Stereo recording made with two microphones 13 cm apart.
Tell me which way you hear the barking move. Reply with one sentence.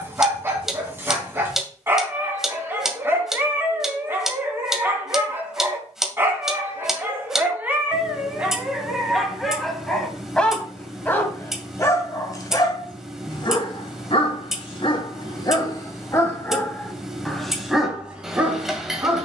In this clip you hear the barking go left and come back.